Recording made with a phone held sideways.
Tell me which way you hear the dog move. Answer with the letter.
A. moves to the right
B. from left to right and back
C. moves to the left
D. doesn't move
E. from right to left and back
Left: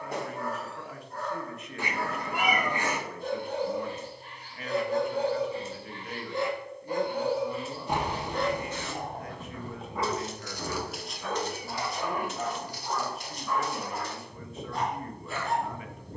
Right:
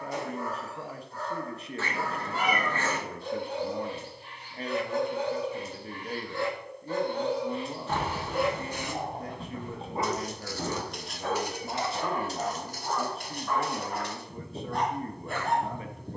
A.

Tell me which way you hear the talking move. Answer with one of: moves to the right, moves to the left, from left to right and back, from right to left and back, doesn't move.
doesn't move.